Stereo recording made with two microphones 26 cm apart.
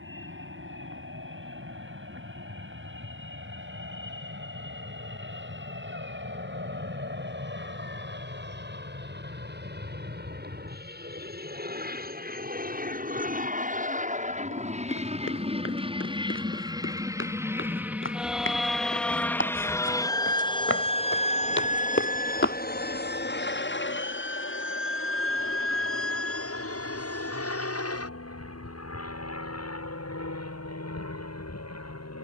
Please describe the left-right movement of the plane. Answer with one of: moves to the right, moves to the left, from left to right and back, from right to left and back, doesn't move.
moves to the left.